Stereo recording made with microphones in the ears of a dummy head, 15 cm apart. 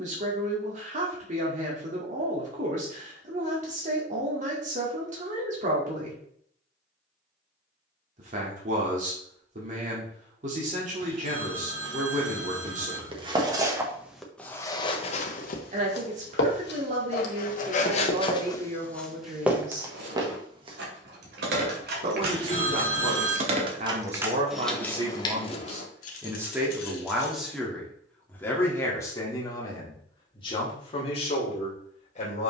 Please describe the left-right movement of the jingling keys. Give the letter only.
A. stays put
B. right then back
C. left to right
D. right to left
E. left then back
D.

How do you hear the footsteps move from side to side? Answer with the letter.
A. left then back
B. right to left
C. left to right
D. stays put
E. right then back
A.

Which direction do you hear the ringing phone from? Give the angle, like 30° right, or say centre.
30° right.